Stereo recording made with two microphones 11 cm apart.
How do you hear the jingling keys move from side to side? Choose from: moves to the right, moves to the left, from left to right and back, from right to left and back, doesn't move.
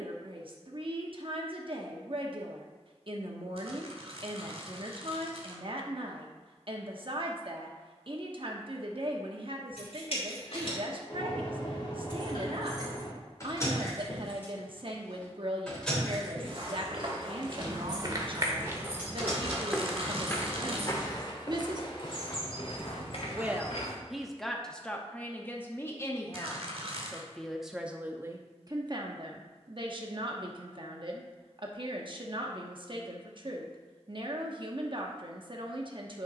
moves to the right.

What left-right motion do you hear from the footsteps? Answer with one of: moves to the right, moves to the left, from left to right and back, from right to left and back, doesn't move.
moves to the left.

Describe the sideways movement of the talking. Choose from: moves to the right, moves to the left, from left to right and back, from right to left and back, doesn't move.
from right to left and back.